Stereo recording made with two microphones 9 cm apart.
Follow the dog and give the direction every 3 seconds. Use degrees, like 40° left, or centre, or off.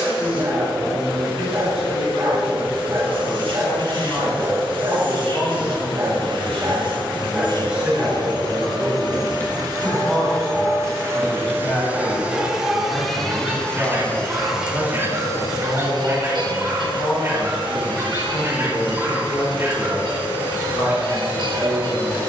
30° right, 30° right, 10° right, 10° left, 20° right, 20° right, 20° right, 20° right.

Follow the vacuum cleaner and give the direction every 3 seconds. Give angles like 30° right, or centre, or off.
70° right, 70° right, 60° right, 40° right, centre, 50° right, 70° right, 70° right.